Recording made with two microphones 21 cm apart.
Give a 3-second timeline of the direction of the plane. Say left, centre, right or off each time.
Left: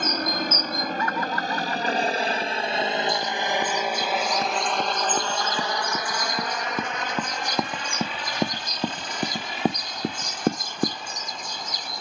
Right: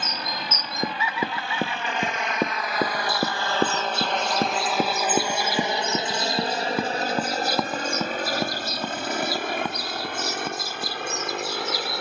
left, centre, right, right.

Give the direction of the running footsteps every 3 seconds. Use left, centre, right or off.
right, right, centre, left.